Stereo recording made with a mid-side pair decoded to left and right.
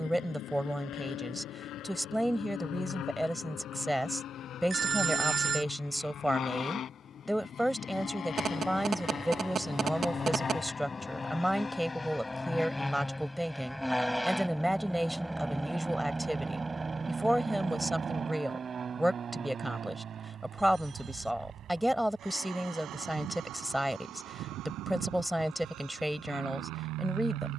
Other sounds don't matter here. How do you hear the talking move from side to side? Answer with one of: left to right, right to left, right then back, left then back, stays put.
stays put.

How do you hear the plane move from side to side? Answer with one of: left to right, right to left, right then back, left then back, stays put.
left to right.